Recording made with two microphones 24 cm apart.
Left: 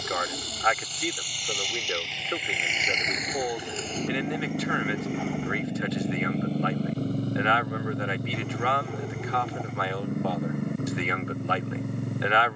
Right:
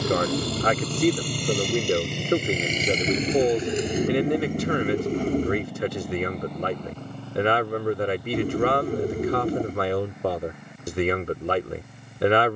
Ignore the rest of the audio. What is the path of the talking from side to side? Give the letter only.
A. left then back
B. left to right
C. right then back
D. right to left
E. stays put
E.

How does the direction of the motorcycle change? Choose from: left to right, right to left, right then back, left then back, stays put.
right to left.